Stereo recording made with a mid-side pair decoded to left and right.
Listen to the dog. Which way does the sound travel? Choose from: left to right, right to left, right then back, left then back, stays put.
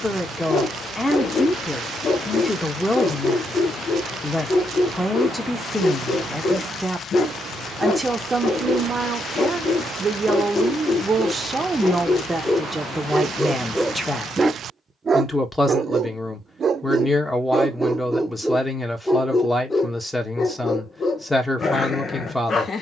right then back.